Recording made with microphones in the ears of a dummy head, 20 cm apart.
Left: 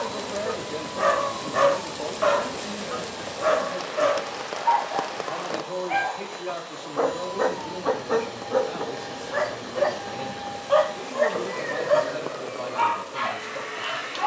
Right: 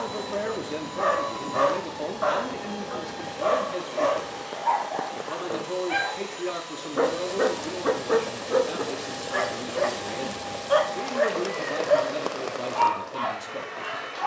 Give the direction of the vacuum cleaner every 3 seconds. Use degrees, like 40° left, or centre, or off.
60° right, 50° right, 20° right, 10° left, 30° left.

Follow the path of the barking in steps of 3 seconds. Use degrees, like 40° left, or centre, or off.
40° left, 10° left, 30° right, 20° right, 30° left.